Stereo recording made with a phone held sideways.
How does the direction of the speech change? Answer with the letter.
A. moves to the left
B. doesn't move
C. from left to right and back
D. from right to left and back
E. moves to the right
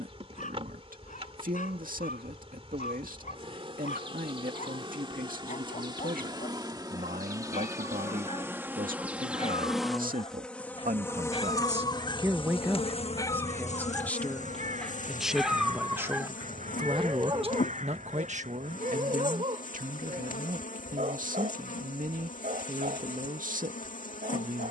D.